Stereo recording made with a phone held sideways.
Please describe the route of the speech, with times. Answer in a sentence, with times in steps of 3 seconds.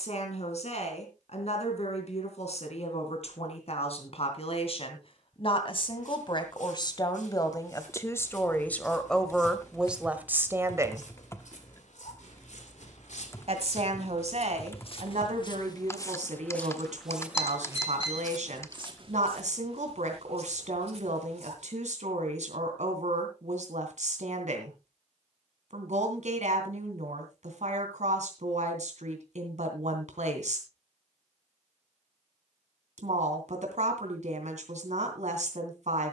You can hear the speech on the left from 0 s, in the centre from 9 s and on the right from 12 s.